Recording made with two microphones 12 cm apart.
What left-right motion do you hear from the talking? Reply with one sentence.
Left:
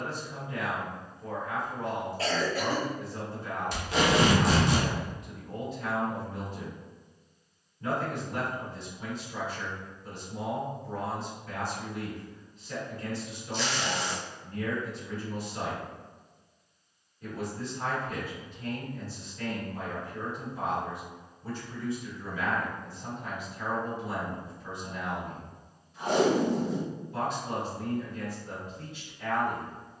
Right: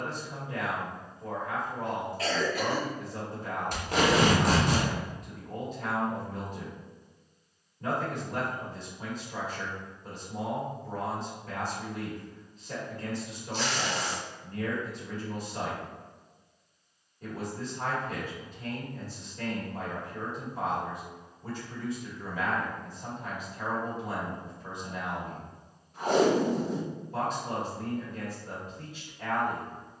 You can hear the talking stay in one place.